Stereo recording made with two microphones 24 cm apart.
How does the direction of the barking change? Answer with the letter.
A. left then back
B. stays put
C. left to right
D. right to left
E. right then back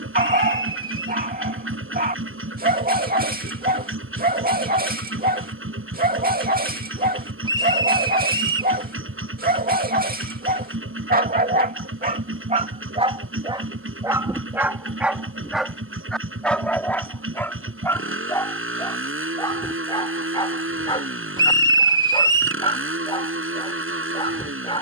D.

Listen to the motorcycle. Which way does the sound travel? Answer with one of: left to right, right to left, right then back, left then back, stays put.
stays put.